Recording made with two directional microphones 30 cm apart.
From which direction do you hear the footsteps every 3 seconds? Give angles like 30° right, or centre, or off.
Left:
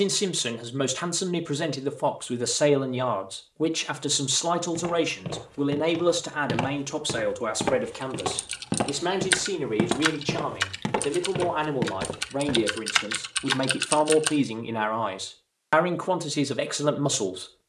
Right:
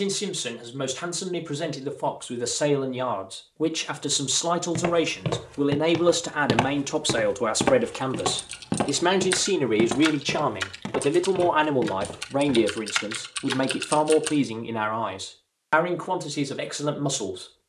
off, 60° right, 30° right, 20° left, 50° left, off.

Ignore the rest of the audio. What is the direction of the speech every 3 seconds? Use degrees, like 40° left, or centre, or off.
20° left, centre, 20° right, 40° right, 10° right, 20° left.